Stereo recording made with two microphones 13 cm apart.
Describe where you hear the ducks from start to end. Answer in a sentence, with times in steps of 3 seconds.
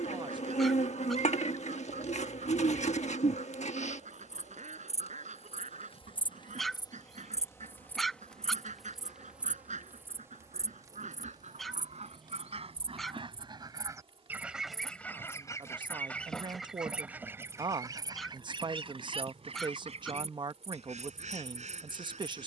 In this clip you hear the ducks on the right from 0 s, in the centre from 15 s and on the right from 18 s.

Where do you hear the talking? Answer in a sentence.
In this clip you hear the talking on the right.